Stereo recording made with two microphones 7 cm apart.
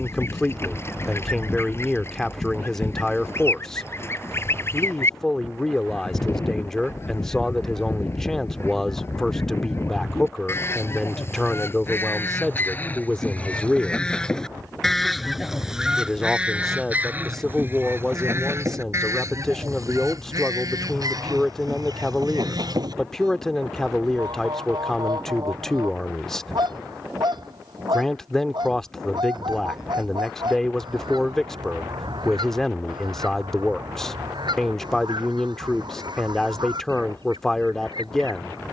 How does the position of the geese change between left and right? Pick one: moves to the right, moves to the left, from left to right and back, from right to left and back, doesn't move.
moves to the right.